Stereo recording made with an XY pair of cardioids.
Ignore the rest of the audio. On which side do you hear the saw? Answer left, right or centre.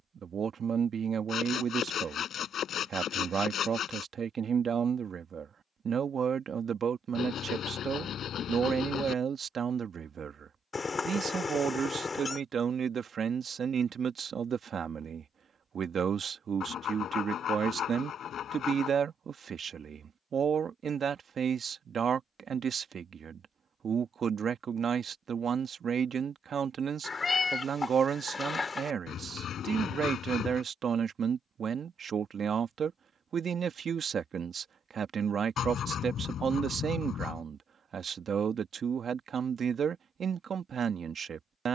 left.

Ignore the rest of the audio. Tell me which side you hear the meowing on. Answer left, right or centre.
left.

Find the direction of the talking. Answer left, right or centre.
right.